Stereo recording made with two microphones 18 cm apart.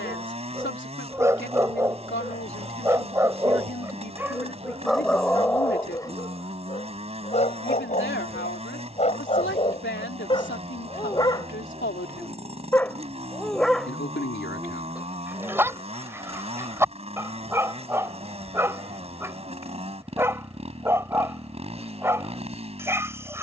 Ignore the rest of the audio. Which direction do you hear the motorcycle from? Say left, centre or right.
right.